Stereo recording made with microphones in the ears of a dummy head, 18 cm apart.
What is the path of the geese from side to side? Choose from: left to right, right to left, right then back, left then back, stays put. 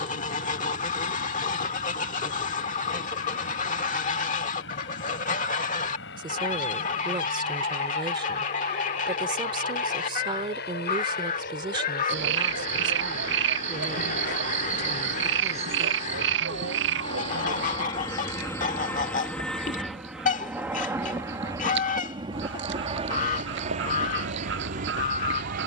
stays put.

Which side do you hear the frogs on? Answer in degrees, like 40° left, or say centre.
60° right.